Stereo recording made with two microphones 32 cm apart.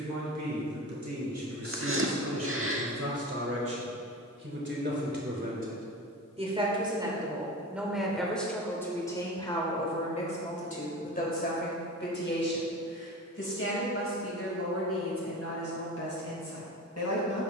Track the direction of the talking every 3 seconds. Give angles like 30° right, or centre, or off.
60° right, 40° right, centre, 20° left, 40° left, 50° left.